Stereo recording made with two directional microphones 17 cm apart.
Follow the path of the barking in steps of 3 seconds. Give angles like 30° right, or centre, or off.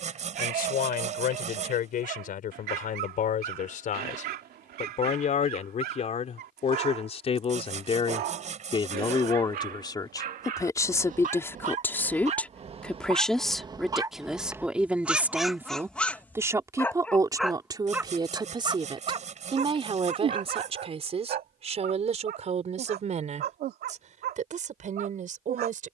70° right, 70° right, 70° right, 50° right, 30° right, centre, 40° right, 70° right, 70° right.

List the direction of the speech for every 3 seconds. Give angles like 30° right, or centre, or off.
60° left, 50° left, 40° left, 20° left, centre, 20° right, 30° right, 40° right, 50° right.